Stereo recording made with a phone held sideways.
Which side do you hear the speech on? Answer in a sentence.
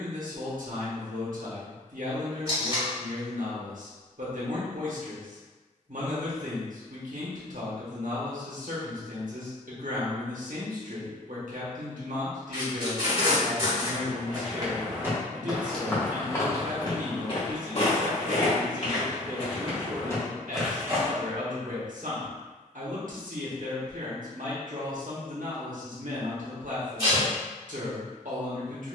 In this clip you hear the speech on the right.